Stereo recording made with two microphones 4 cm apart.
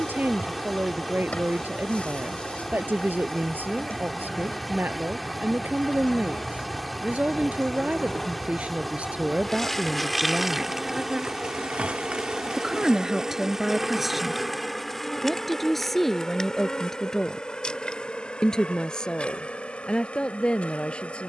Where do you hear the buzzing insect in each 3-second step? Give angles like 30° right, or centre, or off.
30° left, 30° left, 20° left, 10° right, 10° right, 10° left, 30° left.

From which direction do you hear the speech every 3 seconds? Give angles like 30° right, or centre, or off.
50° right, 50° right, 40° right, 30° right, 10° right, centre, 20° left.